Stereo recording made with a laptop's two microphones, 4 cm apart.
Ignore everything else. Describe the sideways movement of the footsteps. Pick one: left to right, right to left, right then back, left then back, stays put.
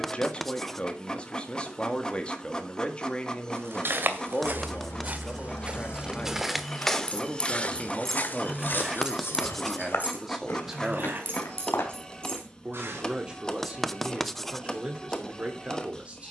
right to left.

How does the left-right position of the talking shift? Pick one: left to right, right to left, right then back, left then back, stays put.
left to right.